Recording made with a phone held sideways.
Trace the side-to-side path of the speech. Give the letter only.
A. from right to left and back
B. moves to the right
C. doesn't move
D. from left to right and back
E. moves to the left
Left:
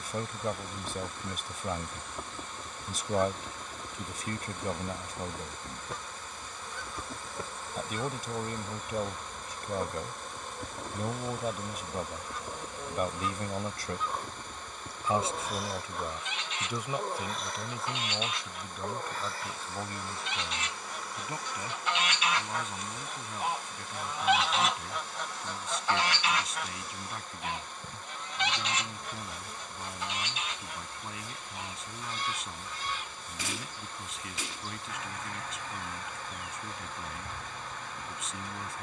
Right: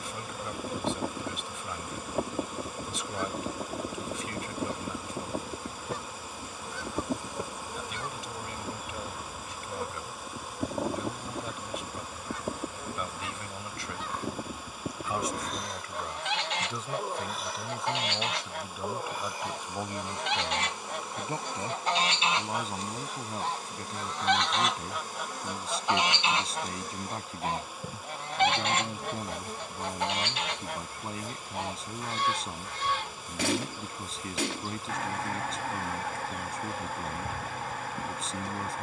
B.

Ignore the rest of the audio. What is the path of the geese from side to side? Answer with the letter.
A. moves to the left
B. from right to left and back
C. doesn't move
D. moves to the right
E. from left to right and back
B.